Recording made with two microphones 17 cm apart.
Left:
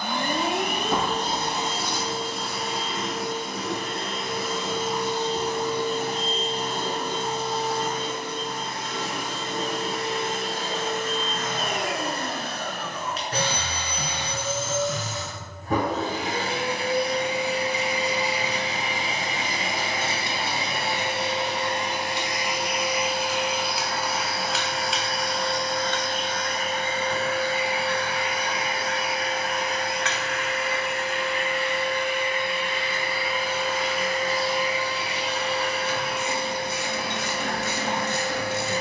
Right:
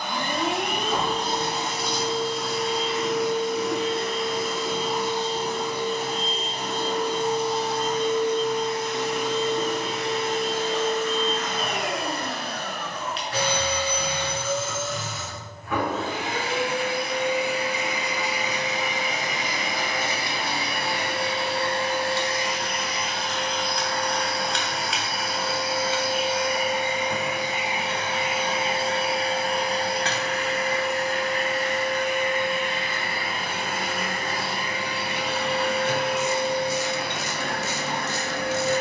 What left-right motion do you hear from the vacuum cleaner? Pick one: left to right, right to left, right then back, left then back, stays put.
left to right.